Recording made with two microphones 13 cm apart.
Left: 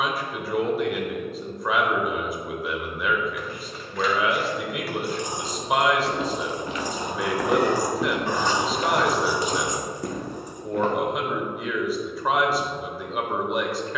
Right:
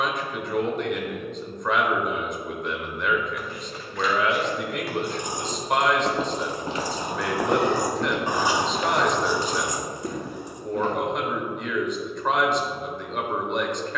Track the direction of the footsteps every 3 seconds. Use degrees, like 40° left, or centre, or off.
off, 50° right, 10° right, 60° left, off.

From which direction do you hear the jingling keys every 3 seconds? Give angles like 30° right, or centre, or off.
off, 50° right, 30° right, 20° left, off.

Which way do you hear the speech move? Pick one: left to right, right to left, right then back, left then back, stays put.
stays put.